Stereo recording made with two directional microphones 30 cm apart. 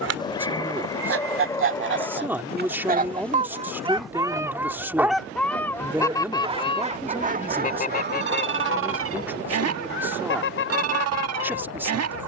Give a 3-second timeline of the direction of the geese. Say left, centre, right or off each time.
right, centre, left, left.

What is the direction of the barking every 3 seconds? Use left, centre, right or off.
centre, centre, right, right.